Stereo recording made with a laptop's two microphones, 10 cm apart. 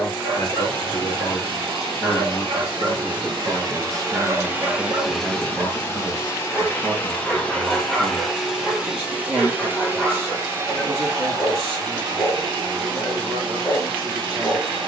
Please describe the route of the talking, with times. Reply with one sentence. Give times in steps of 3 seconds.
You can hear the talking on the left from 0 s, in the centre from 3 s and on the right from 6 s.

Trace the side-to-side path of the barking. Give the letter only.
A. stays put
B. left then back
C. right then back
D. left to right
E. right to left
E.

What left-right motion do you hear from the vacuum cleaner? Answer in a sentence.
You can hear the vacuum cleaner go left and come back.